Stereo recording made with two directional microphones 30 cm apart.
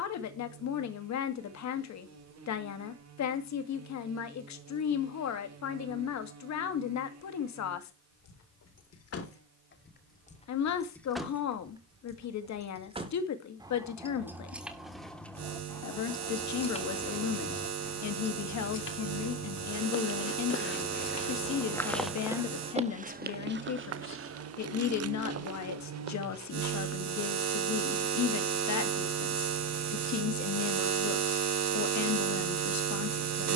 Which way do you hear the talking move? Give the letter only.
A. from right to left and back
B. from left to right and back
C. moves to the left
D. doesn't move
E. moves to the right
D.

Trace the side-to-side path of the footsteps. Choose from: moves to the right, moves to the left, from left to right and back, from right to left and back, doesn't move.
moves to the right.